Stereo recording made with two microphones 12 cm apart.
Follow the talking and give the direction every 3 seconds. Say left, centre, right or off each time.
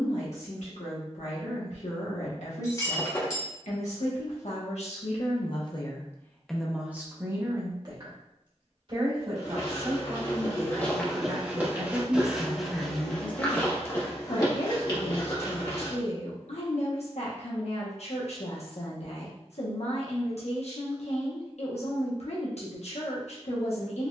left, left, right, right, left, left, left, left.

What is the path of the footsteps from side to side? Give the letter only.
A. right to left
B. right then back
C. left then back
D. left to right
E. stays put
B.